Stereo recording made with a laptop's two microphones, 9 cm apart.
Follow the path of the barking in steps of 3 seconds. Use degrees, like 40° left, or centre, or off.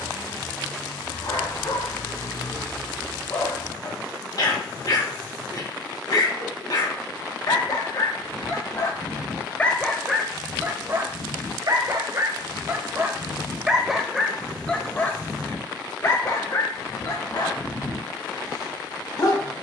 50° left, 50° left, 50° left, 10° right, 10° right, 40° left, 50° left.